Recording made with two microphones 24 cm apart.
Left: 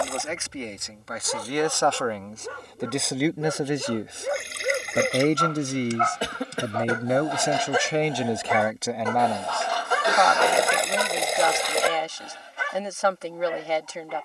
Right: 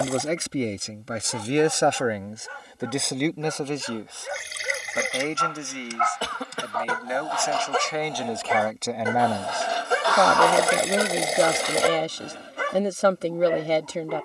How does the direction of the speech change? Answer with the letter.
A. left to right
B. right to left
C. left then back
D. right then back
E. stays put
C.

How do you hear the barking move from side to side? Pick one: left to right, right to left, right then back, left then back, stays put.
left to right.